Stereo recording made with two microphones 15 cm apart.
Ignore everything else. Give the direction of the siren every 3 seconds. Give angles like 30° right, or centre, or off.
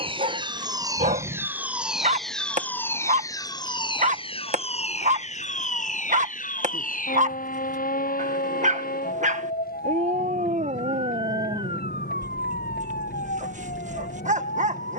10° right, 40° left, 60° left, 70° left, 80° left.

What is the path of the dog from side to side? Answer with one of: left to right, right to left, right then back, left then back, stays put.
stays put.